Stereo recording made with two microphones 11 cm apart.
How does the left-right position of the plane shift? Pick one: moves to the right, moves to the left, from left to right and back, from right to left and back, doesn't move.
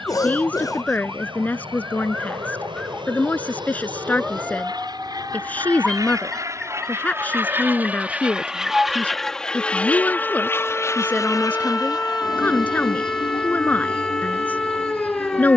moves to the left.